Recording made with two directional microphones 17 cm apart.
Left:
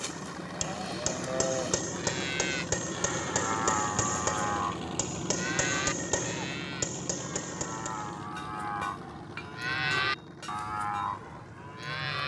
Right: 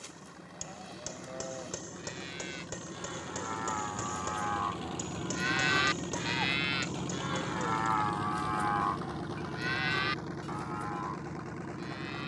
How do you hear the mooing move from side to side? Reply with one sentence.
You can hear the mooing go right and come back.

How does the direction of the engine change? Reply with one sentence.
In this clip you hear the engine go from the left side to the right.